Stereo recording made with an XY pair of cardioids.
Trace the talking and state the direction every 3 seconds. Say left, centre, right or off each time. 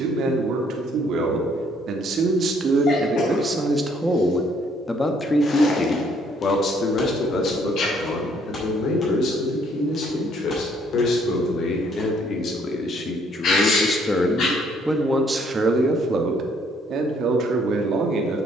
right, centre, left, left, left, right.